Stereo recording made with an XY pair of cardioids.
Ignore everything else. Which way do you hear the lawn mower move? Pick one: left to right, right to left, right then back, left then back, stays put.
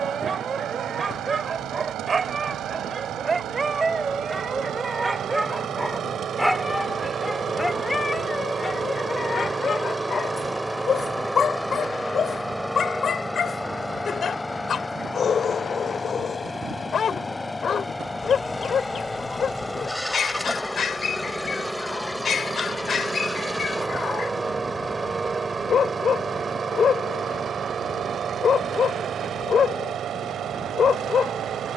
left then back.